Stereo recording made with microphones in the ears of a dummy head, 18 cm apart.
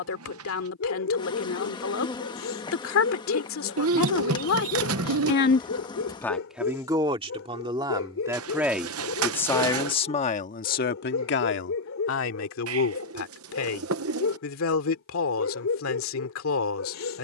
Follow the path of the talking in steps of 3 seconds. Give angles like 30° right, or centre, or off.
70° left, 70° left, 10° right, 40° left, 70° left, 70° left.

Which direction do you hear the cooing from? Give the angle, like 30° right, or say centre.
80° right.